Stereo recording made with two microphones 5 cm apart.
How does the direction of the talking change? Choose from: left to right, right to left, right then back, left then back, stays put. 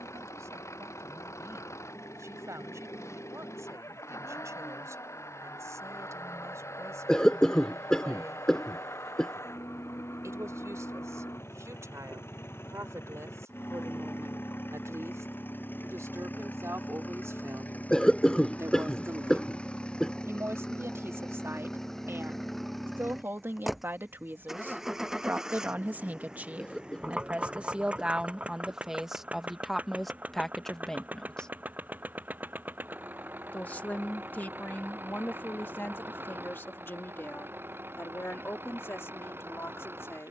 right to left.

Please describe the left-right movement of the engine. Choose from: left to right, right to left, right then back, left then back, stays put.
left to right.